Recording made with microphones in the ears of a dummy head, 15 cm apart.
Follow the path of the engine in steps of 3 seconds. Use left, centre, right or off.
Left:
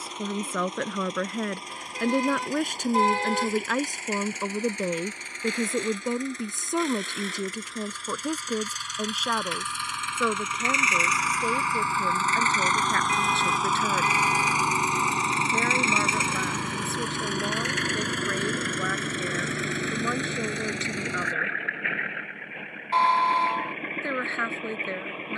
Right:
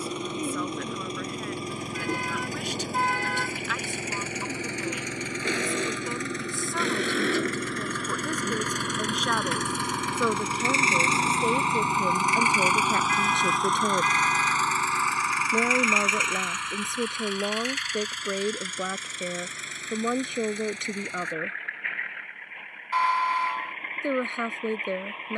right, right, right, right, centre, left, left, left, left.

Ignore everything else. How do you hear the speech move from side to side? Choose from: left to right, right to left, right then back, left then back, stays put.
left to right.